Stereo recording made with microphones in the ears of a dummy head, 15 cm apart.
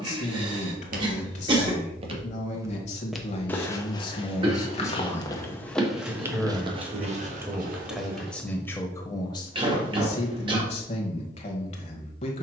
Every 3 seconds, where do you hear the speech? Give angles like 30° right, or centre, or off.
40° left, 30° left, centre, 40° left.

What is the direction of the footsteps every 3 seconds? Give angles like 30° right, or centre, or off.
30° right, 20° left, 40° right, off.